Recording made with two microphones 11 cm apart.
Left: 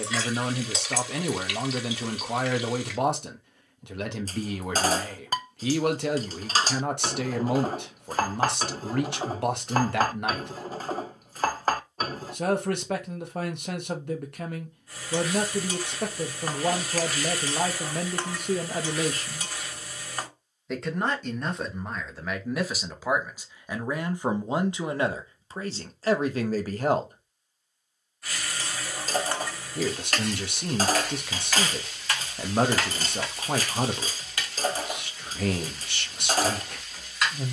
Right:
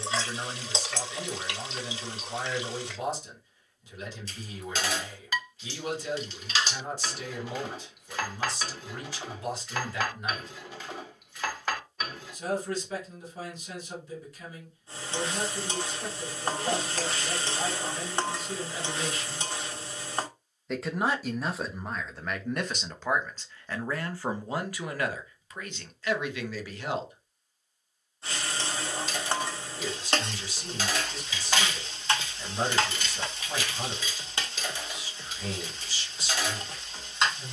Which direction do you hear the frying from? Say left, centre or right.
right.